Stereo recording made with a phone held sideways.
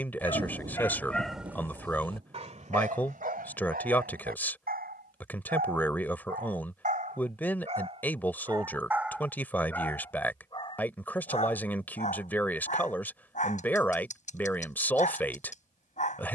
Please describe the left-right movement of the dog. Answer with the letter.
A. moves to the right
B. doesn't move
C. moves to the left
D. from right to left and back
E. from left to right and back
E.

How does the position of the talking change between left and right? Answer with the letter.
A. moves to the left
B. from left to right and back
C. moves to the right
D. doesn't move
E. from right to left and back
D.